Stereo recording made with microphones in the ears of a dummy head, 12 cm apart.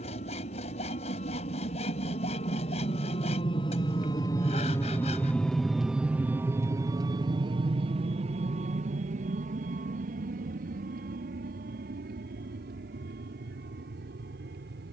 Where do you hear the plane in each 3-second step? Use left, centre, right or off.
left, left, right, right, right.